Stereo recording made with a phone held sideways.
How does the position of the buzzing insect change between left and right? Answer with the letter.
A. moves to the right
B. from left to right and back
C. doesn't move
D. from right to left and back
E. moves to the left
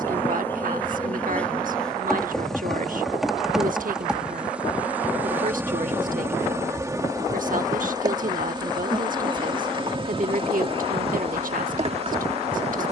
A.